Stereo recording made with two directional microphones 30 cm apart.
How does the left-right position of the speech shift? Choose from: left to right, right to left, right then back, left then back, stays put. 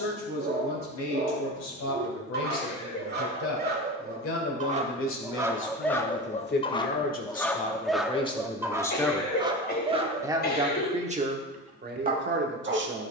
left to right.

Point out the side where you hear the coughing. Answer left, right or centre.
left.